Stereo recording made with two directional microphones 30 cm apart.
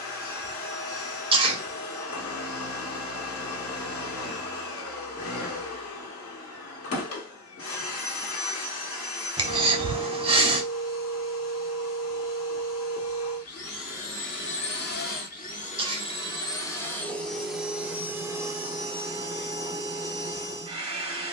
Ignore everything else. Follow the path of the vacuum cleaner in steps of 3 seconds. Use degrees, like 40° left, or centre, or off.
50° left, 50° left, 50° left, 50° left, 50° left, 10° left, 20° right.